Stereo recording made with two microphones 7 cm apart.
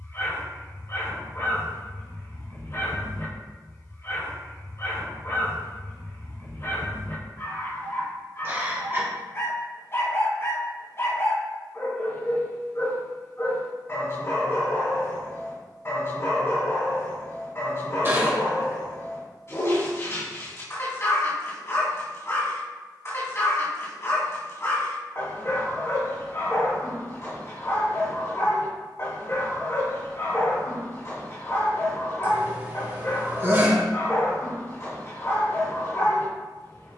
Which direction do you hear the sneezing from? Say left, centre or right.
right.